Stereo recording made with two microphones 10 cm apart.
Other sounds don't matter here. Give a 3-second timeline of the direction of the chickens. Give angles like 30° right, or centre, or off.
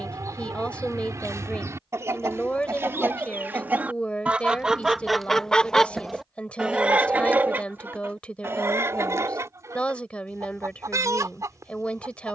30° right, 10° right, 20° right, 30° right.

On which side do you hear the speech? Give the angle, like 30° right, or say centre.
10° left.